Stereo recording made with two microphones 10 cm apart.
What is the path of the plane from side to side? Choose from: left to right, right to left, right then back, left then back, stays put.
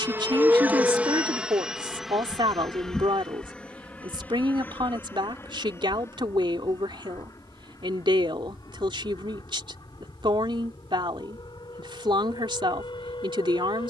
right to left.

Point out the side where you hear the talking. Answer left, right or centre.
right.